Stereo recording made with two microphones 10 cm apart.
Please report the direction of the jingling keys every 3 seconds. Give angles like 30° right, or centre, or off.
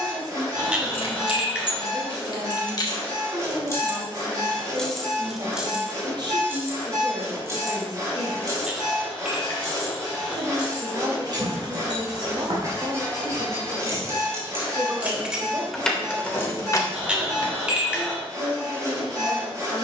60° left, 10° left, 30° right, 50° right, 40° right, 20° left, off.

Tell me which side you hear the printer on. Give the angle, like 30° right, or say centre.
30° right.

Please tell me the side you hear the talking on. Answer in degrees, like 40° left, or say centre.
50° right.